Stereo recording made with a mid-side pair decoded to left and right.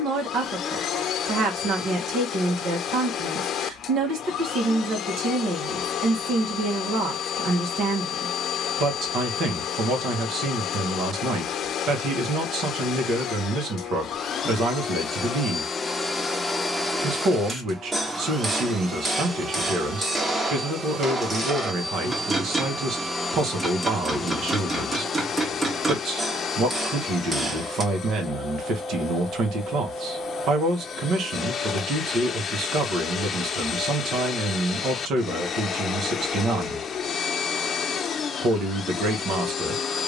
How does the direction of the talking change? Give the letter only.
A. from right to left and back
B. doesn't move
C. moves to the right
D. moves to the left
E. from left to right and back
B.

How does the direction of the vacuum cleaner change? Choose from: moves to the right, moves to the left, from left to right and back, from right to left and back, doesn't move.
from left to right and back.